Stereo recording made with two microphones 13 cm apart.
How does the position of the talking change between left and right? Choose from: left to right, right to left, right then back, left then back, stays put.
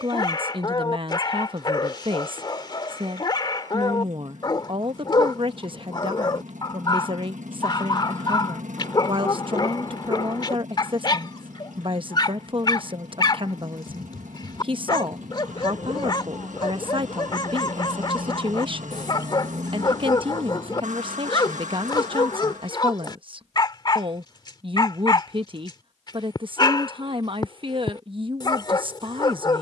stays put.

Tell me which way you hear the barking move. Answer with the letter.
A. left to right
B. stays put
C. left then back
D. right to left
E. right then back
B.